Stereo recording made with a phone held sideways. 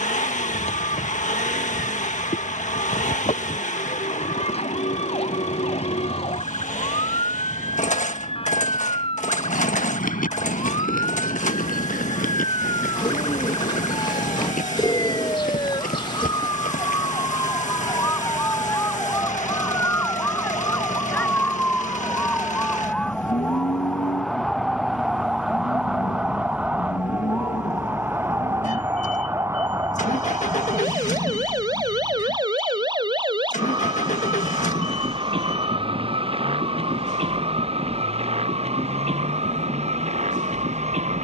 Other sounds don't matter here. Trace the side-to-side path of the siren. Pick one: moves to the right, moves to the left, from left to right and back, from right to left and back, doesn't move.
moves to the right.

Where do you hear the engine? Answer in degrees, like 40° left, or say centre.
60° left.